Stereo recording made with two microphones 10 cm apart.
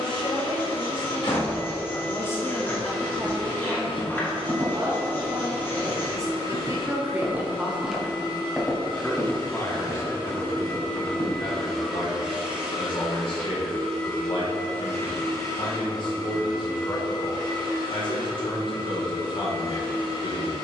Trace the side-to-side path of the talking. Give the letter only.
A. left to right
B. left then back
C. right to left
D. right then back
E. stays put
D.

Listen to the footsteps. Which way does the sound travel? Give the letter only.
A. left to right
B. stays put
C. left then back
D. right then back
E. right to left
E.